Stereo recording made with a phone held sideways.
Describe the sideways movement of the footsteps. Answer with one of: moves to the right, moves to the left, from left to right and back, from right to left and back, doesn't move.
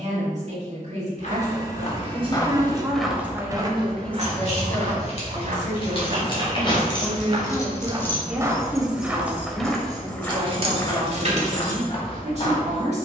from left to right and back.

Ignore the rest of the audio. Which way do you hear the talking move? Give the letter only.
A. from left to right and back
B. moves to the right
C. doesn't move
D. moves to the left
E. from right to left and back
E.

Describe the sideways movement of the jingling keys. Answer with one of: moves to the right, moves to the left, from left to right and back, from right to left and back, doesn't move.
moves to the right.